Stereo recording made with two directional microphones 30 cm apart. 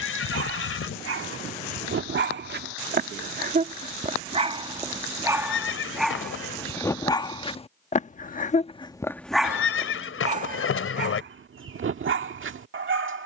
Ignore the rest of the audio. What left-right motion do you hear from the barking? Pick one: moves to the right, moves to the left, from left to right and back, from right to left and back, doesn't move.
from right to left and back.